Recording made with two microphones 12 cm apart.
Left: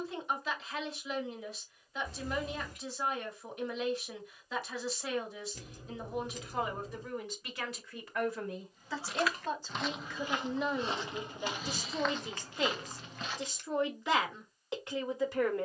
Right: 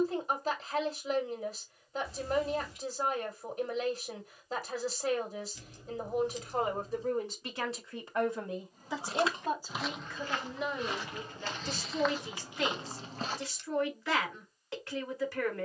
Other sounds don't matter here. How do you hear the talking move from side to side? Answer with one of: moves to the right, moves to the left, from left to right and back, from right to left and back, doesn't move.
moves to the left.